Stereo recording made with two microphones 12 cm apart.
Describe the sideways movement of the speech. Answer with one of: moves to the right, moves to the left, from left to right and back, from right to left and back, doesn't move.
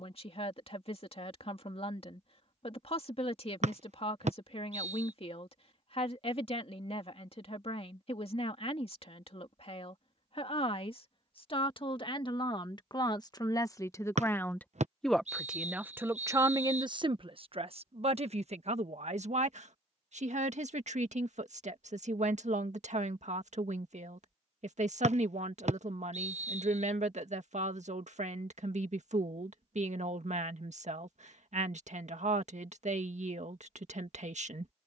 moves to the right.